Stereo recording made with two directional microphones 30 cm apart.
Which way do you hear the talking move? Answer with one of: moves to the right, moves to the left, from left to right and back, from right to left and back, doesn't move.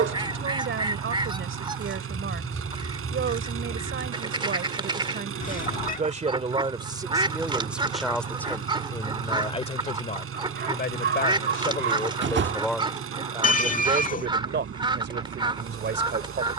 from right to left and back.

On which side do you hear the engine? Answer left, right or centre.
right.